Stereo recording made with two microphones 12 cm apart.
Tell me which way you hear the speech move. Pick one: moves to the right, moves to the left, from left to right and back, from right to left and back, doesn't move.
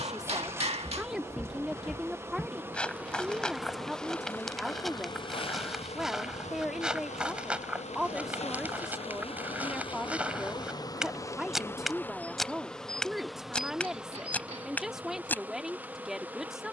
doesn't move.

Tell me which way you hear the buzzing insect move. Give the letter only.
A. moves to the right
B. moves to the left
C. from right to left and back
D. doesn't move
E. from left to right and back
C.